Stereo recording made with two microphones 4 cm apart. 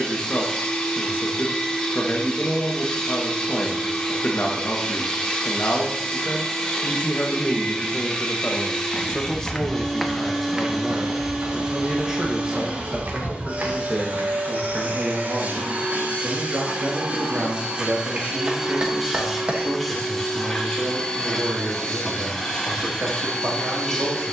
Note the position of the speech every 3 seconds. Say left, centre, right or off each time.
left, left, left, centre, right, right, right, right.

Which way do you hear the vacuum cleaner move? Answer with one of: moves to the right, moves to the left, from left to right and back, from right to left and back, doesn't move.
from left to right and back.